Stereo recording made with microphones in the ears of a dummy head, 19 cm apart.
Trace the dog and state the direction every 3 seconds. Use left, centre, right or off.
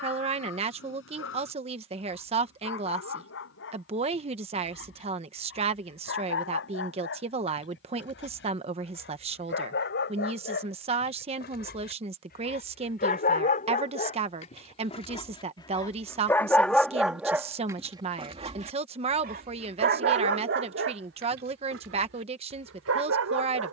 left, left, left, left, left, centre, right, right.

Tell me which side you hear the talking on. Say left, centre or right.
right.